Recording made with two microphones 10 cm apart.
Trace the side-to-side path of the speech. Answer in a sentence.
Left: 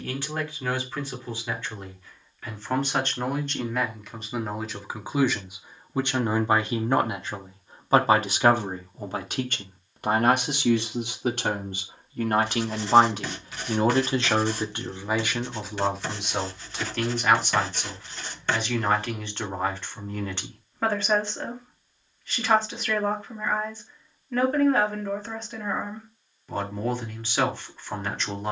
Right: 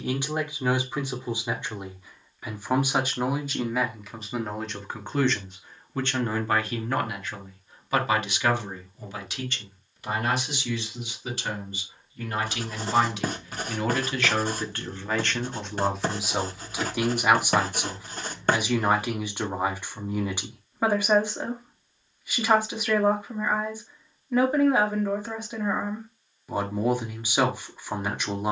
You can hear the speech go left and come back.